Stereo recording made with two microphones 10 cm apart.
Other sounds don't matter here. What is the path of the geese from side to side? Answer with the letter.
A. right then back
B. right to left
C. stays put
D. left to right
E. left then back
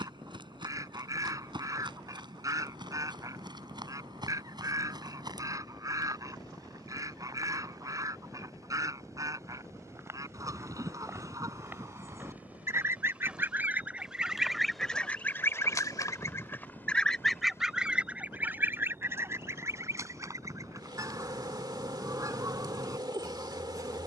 E.